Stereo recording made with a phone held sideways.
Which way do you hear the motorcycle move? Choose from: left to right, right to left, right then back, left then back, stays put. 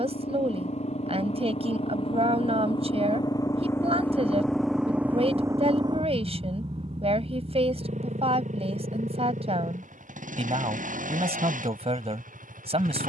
left to right.